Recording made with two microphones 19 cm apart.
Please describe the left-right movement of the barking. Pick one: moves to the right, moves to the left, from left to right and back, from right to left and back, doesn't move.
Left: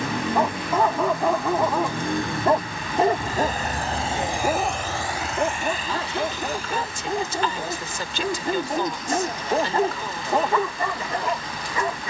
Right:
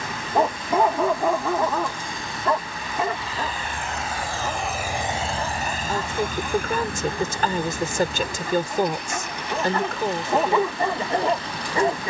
from right to left and back.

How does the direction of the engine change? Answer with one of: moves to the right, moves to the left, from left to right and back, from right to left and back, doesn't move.
moves to the right.